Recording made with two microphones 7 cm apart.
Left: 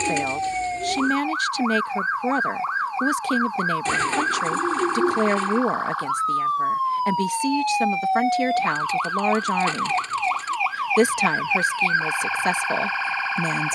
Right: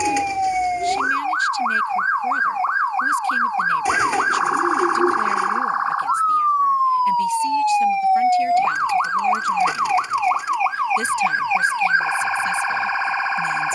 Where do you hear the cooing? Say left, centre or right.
centre.